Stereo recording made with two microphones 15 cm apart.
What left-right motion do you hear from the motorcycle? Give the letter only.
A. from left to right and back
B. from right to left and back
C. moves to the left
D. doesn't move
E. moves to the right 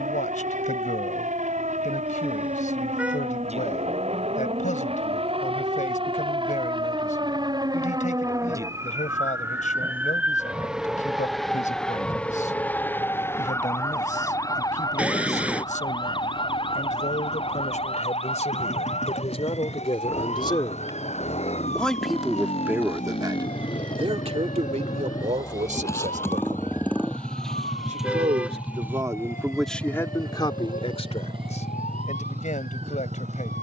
E.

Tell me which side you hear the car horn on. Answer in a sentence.
You can hear the car horn in the centre.